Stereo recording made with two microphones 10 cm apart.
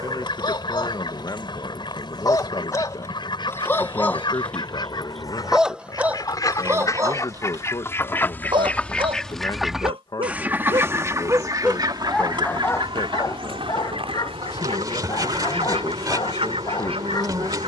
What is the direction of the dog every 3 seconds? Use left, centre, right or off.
left, centre, right, right, left, left.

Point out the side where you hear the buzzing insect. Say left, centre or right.
right.